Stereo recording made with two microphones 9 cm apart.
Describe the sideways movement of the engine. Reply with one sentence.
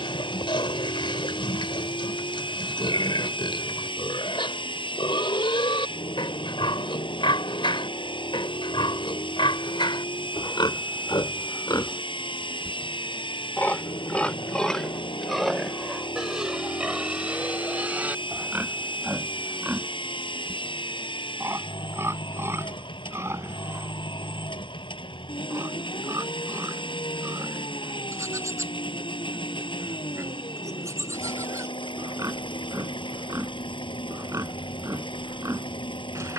You can hear the engine stay put.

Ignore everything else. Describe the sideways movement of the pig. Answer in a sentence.
In this clip you hear the pig move from left to right.